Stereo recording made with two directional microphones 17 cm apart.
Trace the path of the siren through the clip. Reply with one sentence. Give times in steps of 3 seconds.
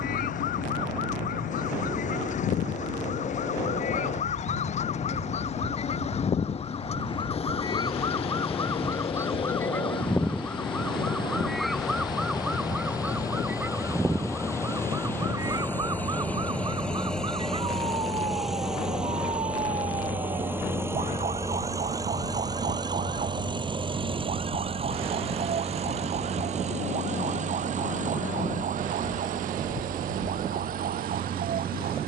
In this clip you hear the siren on the left from 0 s, in the centre from 9 s and on the right from 15 s.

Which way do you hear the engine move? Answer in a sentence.
In this clip you hear the engine travel towards the right.